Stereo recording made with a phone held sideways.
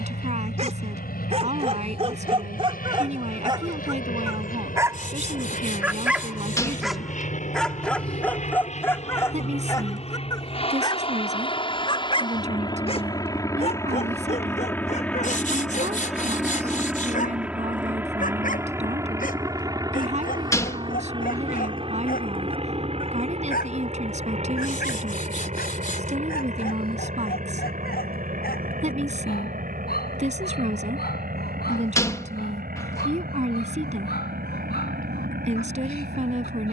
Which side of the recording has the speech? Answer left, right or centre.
right.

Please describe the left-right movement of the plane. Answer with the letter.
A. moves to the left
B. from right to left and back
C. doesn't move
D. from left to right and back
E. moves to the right
E.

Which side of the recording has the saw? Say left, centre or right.
left.